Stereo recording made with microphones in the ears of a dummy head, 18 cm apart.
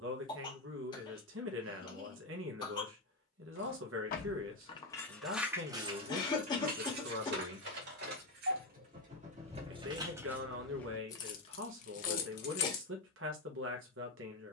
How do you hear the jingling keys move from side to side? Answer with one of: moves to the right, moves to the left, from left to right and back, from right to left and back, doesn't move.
from left to right and back.